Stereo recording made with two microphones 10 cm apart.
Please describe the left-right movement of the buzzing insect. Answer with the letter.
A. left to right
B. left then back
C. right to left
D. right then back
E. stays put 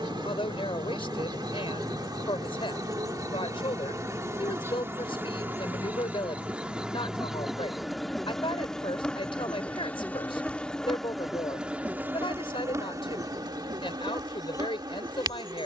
B.